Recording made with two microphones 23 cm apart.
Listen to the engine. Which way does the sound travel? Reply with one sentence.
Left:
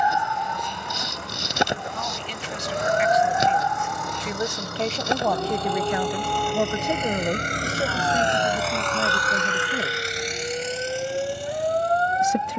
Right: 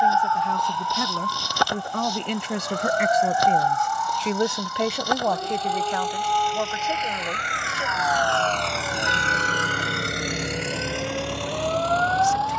In this clip you hear the engine travel towards the right.